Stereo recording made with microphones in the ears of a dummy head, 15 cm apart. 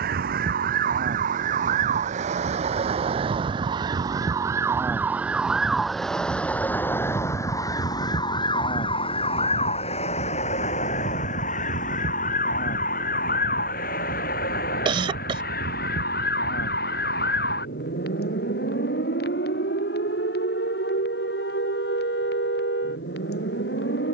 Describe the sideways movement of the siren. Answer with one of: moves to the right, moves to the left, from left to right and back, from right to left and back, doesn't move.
moves to the left.